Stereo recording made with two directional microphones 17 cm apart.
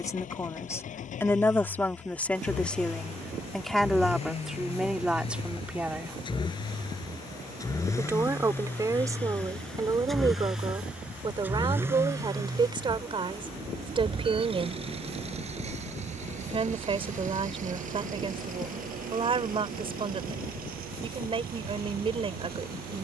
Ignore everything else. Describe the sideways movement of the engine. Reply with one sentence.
In this clip you hear the engine travel towards the right.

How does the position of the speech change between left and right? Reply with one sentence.
In this clip you hear the speech travel towards the right.